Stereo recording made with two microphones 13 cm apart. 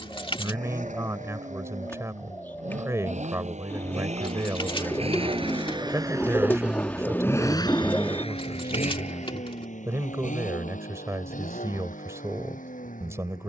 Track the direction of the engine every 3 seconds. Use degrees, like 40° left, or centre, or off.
70° right, 50° right, 20° left, 70° left, 80° left.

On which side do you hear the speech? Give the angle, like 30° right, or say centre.
20° right.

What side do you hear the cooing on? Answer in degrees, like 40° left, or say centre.
20° left.